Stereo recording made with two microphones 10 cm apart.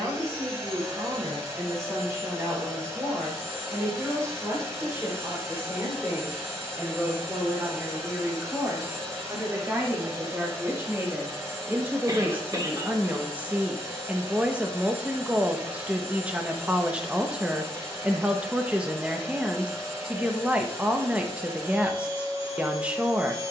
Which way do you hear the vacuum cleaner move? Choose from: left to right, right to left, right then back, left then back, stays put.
stays put.